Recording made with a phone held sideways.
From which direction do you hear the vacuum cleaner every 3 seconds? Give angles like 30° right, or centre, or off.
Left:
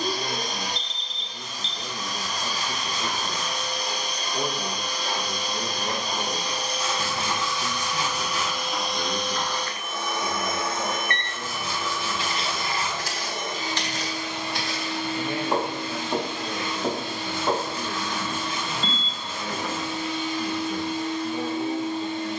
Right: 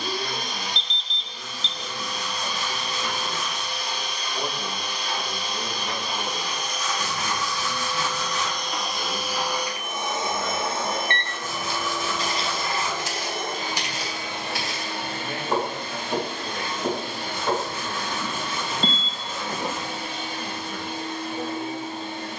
40° left, 40° left, 20° left, 20° right, 50° right, 60° right, 60° right, 60° right.